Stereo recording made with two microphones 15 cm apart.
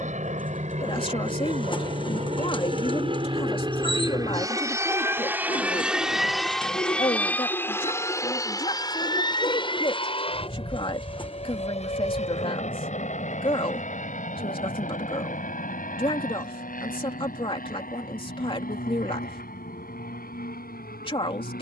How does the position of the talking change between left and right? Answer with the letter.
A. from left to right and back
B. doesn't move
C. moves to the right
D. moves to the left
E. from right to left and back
B.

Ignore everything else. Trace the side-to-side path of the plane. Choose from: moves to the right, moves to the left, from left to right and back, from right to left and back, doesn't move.
moves to the left.